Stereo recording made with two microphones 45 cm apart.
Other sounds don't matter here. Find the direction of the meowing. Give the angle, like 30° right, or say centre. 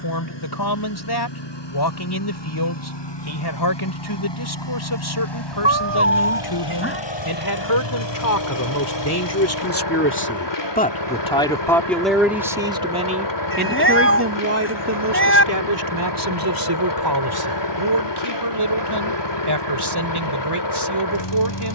30° left.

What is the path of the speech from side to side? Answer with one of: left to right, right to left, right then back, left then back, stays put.
left to right.